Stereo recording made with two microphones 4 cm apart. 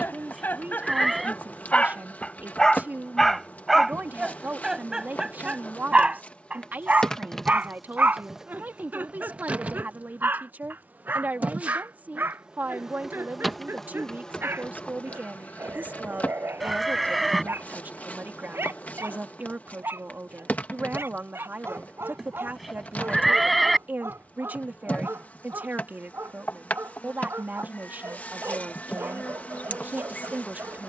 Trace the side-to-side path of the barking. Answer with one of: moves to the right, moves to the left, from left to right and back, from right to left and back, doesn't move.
moves to the right.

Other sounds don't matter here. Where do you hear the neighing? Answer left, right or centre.
centre.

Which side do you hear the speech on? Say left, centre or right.
right.